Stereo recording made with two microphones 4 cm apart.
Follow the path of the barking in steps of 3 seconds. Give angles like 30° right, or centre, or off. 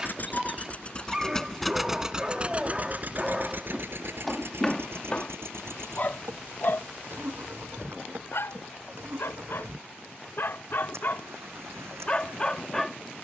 20° right, centre, 60° left, 60° left, 10° left.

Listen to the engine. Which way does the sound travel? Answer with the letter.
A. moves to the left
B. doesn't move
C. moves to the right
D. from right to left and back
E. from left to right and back
C.